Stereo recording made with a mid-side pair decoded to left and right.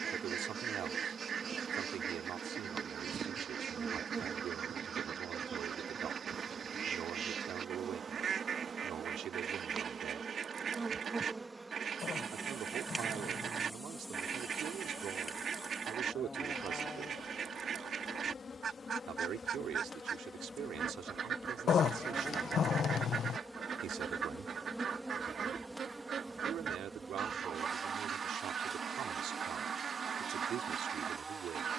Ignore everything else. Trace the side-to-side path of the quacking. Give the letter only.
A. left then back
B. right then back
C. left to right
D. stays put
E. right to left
D.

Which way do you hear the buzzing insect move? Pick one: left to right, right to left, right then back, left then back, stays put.
left then back.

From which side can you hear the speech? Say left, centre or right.
right.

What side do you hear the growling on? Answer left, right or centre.
left.